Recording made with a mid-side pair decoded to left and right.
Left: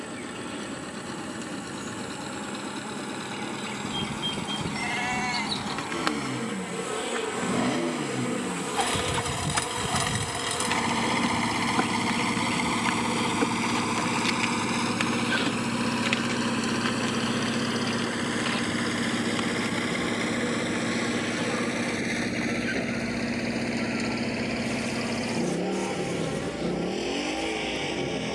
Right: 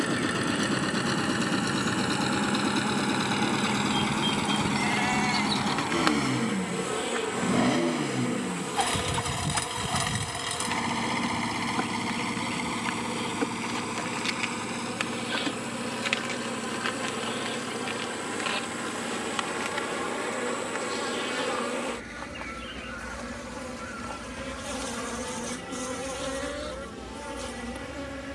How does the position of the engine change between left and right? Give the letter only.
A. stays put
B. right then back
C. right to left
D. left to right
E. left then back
C.